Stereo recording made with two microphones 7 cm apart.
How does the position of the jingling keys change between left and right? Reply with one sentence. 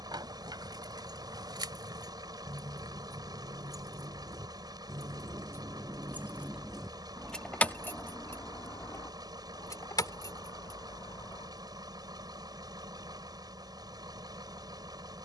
You can hear the jingling keys go from the right side to the left.